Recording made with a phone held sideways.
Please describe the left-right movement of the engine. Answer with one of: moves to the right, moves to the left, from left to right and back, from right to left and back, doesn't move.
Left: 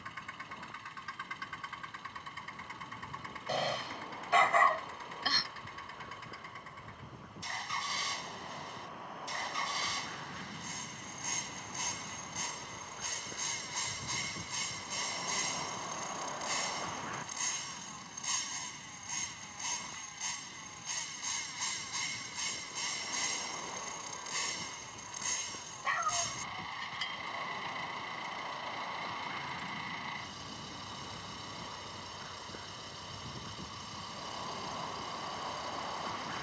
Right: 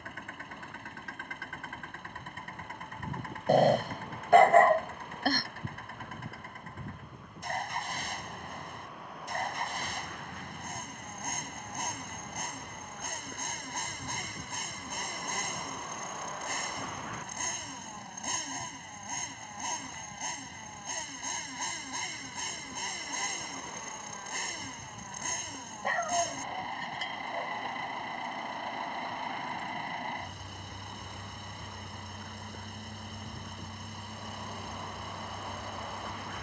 doesn't move.